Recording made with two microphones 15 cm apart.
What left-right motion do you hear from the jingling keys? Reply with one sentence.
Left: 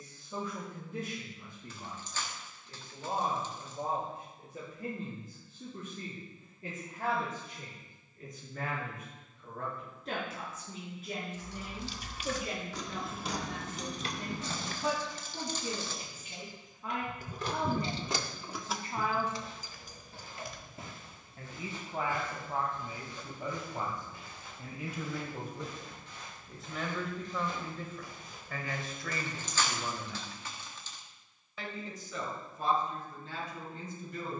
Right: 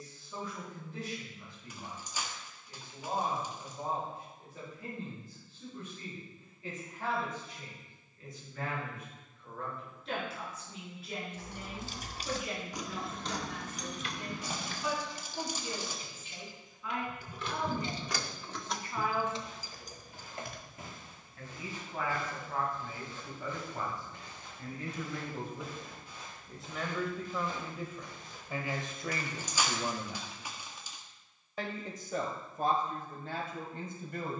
You can hear the jingling keys move from right to left and back again.